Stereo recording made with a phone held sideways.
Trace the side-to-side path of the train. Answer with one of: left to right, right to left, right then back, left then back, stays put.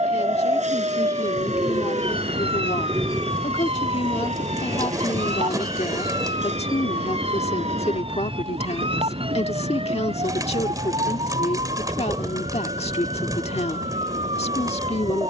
stays put.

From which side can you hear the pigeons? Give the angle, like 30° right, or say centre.
30° right.